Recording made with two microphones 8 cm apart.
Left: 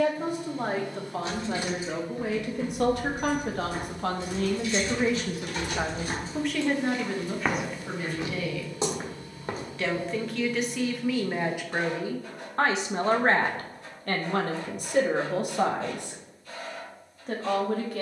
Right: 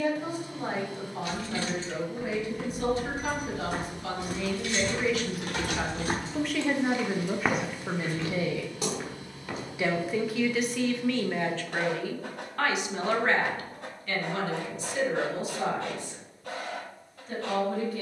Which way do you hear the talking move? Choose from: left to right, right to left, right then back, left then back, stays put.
right then back.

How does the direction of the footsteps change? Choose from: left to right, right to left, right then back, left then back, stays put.
right to left.